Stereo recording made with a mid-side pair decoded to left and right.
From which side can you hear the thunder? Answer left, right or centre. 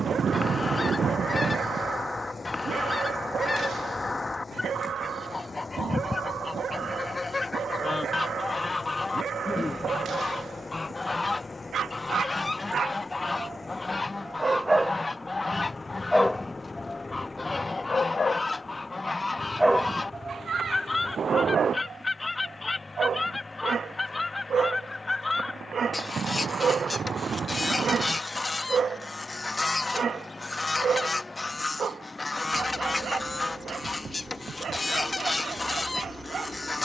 right.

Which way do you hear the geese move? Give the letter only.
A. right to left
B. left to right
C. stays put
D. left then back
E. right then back
C.